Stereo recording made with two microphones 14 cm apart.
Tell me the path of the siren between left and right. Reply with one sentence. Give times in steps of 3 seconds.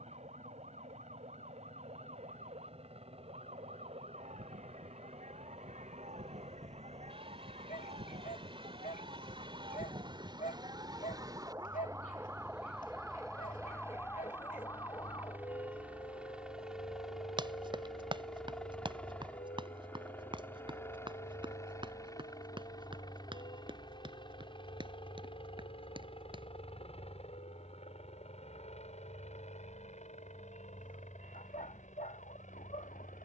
You can hear the siren on the right from 0 s, in the centre from 12 s and on the left from 15 s.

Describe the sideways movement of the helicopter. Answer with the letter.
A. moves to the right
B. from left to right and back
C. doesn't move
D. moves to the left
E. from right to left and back
D.